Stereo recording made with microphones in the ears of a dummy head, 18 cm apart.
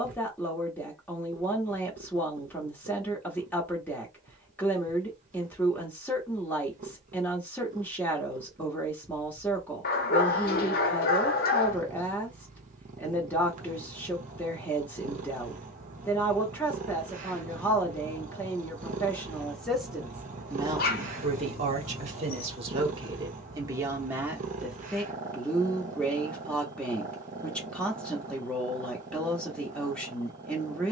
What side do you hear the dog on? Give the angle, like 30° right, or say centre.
50° left.